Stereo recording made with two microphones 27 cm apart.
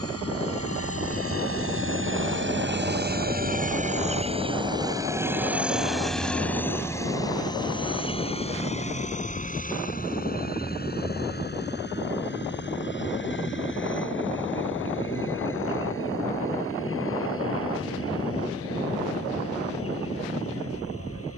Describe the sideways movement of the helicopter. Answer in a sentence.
You can hear the helicopter move from right to left.